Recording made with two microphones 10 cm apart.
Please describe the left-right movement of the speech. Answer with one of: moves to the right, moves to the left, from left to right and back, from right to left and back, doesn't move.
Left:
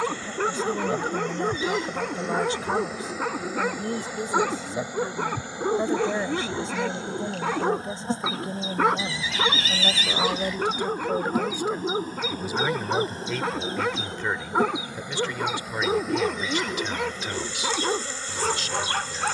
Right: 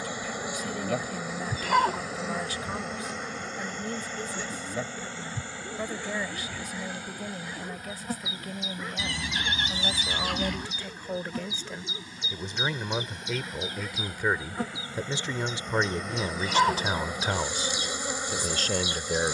moves to the right.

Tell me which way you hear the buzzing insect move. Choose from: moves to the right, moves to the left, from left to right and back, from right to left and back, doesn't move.
from right to left and back.